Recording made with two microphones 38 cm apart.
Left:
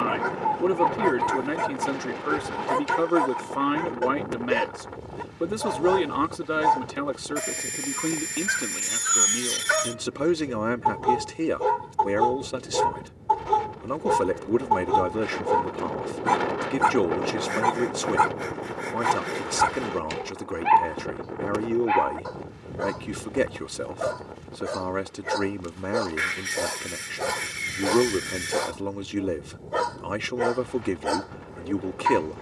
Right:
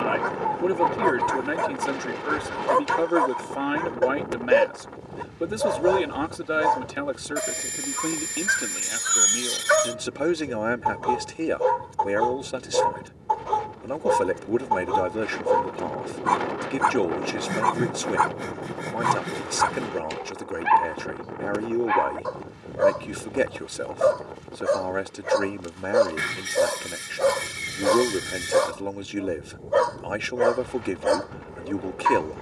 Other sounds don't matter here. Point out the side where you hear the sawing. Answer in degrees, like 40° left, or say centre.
50° right.